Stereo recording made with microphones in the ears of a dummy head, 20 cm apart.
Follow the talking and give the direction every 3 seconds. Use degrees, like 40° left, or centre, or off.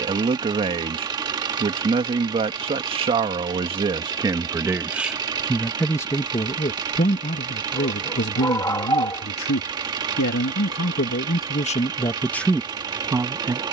20° right, 10° right, 40° left, 50° left, centre.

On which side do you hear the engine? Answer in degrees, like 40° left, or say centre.
20° right.